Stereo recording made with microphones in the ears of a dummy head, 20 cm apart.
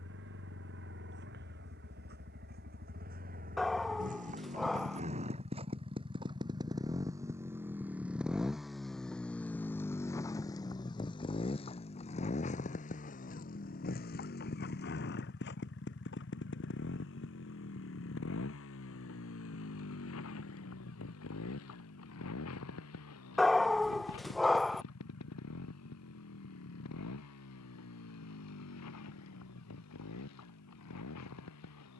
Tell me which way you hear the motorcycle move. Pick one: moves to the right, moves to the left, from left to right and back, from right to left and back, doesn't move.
moves to the left.